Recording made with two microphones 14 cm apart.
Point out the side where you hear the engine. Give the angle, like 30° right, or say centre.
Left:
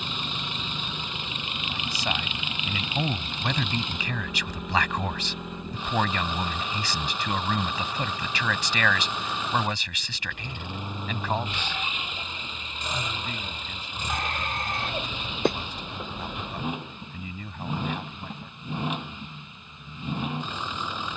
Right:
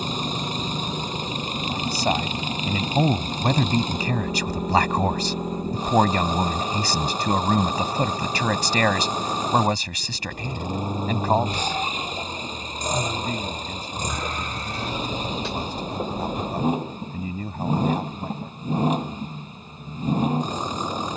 40° right.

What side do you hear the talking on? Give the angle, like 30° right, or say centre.
40° right.